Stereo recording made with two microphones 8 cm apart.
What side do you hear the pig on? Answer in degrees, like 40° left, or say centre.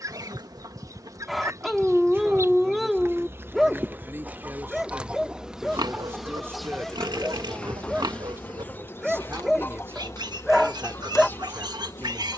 60° right.